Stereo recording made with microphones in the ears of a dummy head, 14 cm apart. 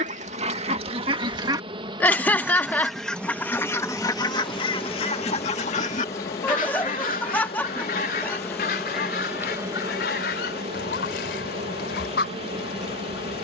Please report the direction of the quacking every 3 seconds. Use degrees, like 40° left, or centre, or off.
20° right, 30° left, 60° left, 70° left, 70° left.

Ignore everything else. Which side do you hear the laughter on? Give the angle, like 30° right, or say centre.
10° left.